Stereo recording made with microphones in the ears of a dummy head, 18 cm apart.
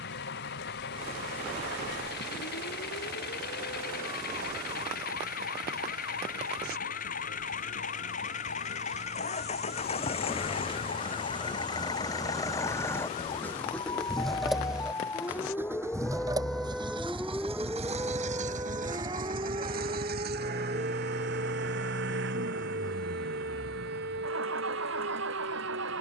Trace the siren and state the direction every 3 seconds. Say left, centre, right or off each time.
left, left, left, left, left, centre, right, right, right.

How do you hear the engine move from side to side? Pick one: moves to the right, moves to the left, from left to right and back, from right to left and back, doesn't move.
moves to the right.